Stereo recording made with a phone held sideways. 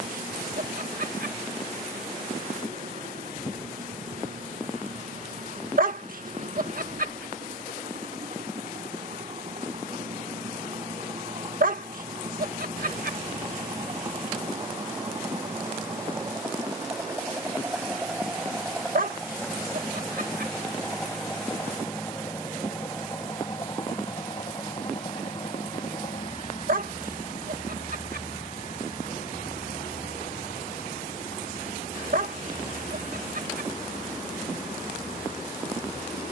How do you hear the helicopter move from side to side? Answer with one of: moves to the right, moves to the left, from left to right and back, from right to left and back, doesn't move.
moves to the left.